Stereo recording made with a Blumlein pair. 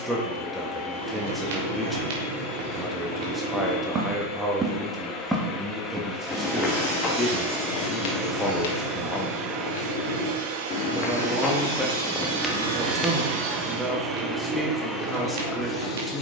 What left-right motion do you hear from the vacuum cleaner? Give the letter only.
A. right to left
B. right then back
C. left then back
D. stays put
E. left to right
B.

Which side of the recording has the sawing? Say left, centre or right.
right.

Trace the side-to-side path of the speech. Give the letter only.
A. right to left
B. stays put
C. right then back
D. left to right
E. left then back
B.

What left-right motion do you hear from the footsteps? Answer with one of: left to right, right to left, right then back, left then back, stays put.
left then back.